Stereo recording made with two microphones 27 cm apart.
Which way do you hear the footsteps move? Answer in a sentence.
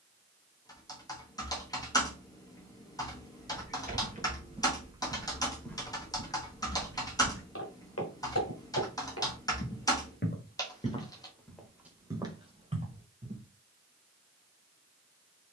In this clip you hear the footsteps move from right to left and back again.